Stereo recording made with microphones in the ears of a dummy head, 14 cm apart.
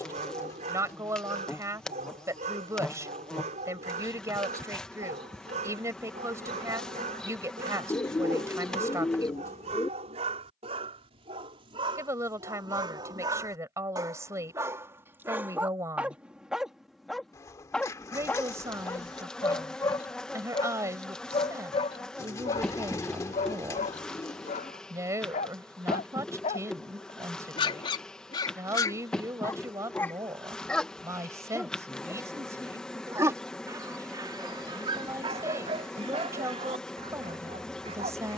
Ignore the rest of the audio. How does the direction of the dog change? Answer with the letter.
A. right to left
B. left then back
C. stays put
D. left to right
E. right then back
B.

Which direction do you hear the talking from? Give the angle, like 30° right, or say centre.
20° right.